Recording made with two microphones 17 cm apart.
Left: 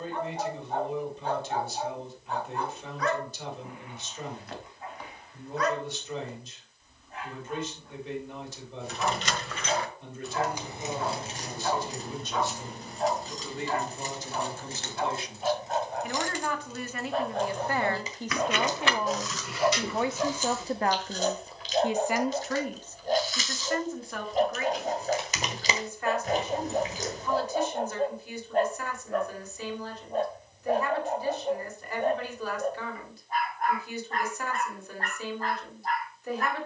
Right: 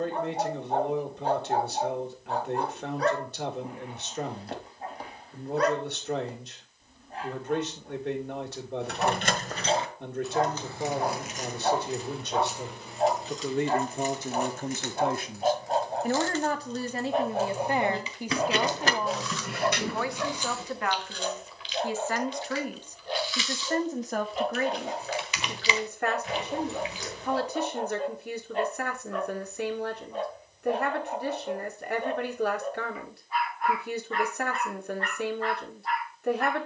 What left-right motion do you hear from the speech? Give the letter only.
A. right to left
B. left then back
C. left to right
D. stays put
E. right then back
B.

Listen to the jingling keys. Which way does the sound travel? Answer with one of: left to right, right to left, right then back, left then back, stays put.
left then back.